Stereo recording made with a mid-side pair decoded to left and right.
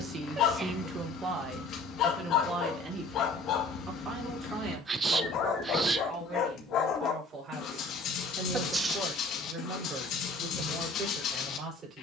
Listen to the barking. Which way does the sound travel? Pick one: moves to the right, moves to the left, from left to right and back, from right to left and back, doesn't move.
doesn't move.